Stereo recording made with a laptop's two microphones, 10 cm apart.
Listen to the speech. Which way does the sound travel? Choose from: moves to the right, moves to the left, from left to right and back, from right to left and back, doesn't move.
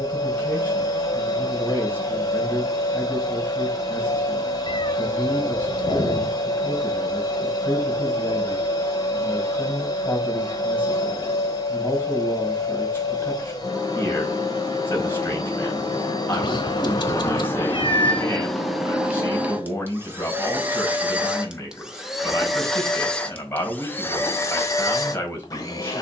doesn't move.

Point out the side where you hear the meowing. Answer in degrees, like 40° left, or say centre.
40° left.